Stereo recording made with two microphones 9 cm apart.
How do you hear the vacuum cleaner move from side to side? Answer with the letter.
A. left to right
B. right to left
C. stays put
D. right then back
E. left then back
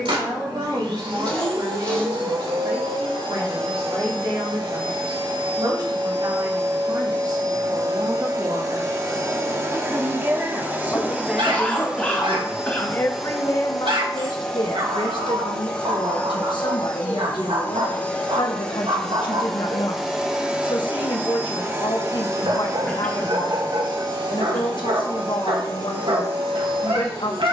E.